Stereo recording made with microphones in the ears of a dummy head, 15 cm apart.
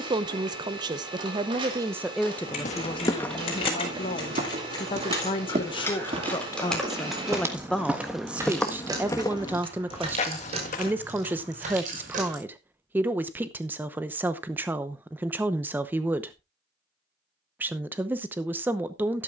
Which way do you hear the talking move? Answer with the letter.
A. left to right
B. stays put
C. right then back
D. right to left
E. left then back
E.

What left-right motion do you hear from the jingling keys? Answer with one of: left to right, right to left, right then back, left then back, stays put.
left to right.